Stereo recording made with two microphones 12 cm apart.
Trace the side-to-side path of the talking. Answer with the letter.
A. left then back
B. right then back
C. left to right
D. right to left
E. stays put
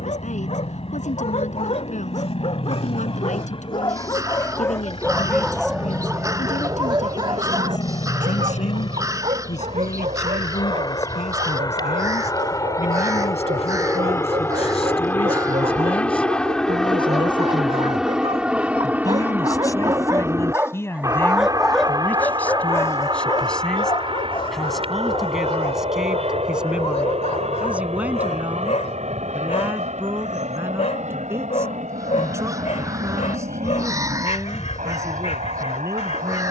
C.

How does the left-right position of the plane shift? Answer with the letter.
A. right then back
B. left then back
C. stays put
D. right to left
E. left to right
E.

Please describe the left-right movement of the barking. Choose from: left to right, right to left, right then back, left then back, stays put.
right then back.